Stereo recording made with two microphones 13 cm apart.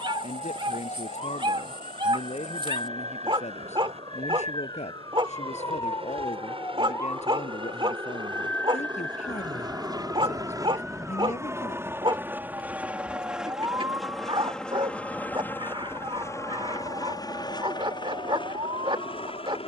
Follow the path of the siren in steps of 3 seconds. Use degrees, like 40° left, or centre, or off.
50° left, 40° left, 20° left, centre, 20° right, 40° right, 50° right.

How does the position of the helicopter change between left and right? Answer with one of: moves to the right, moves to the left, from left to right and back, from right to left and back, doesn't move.
moves to the left.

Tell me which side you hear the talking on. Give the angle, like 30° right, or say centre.
60° left.